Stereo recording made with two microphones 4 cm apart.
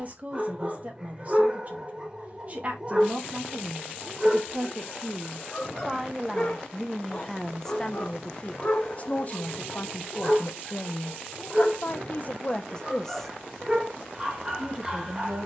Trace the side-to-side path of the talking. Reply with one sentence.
In this clip you hear the talking go left and come back.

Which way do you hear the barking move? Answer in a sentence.
In this clip you hear the barking go left and come back.